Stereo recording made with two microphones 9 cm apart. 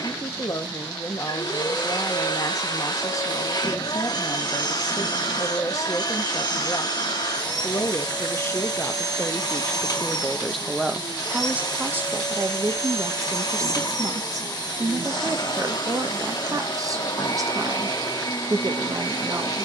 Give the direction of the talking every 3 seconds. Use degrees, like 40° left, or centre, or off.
40° left, 40° left, 30° left, centre, 40° right, 40° right, 40° right.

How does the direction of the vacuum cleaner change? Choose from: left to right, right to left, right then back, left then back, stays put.
stays put.